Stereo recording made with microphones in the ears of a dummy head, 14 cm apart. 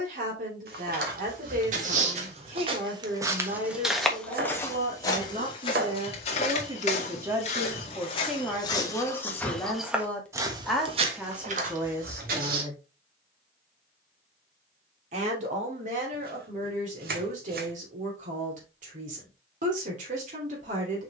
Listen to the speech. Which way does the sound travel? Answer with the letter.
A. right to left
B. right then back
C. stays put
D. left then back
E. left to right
D.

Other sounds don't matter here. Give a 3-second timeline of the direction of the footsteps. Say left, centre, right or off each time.
right, centre, left, right, right, off, off.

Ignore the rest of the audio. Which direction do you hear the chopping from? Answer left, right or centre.
right.